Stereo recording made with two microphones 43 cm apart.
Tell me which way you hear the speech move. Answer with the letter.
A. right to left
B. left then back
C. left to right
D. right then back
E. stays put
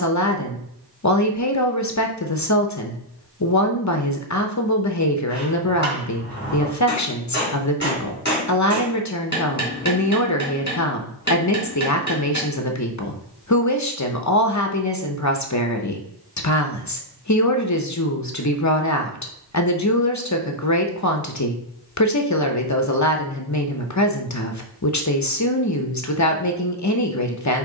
E.